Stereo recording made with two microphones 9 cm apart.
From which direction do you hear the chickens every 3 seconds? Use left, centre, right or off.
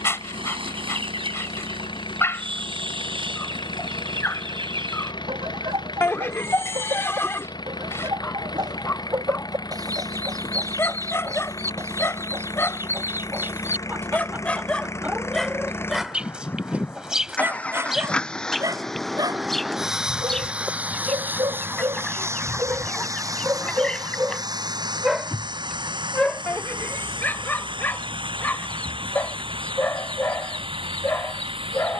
right, right, right, right, right, centre, centre, centre, centre, centre, centre.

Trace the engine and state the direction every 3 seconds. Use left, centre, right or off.
left, left, left, left, left, left, centre, right, right, right, right.